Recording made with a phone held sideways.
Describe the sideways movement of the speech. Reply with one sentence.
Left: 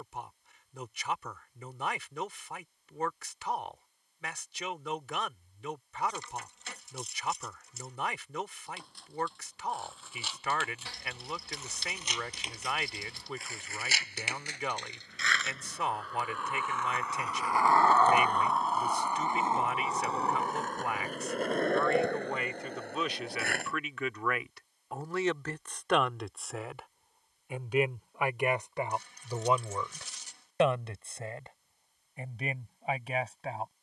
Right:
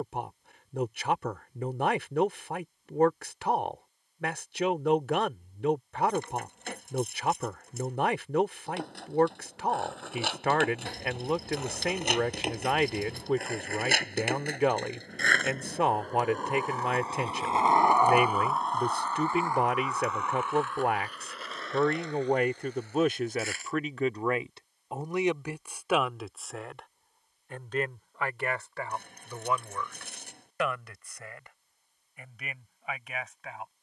In this clip you hear the speech move from right to left.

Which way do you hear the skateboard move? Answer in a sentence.
You can hear the skateboard move to the left.